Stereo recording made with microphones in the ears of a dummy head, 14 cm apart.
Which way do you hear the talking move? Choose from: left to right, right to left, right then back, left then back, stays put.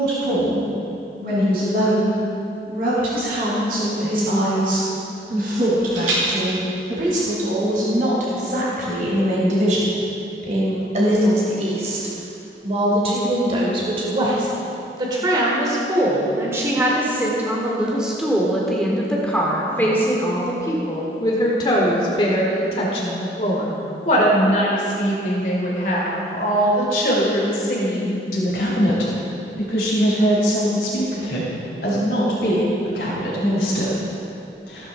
right to left.